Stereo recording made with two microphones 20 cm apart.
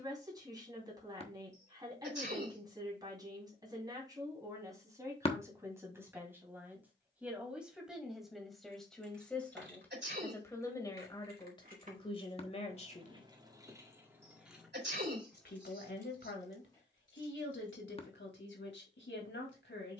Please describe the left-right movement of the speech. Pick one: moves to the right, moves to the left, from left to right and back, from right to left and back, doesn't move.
moves to the left.